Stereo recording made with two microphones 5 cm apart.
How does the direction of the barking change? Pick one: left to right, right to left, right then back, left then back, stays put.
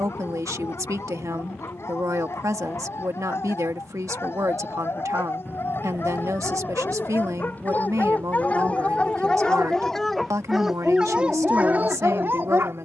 left to right.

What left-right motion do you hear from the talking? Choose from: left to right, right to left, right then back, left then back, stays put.
stays put.